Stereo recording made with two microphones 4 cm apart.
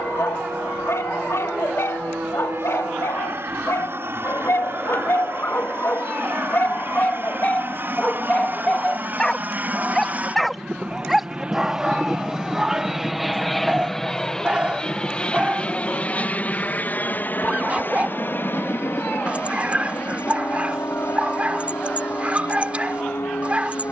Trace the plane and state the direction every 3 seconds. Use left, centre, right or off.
right, right, right, right, centre, left, left, left.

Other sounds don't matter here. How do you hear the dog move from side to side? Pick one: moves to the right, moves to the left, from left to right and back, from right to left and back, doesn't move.
moves to the right.